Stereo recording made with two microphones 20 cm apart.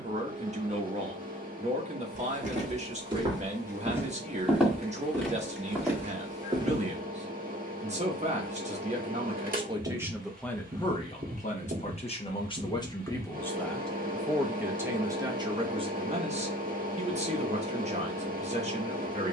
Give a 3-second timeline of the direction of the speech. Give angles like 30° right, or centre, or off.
40° right, 40° right, 40° right, centre, 10° left, 30° right, 30° right.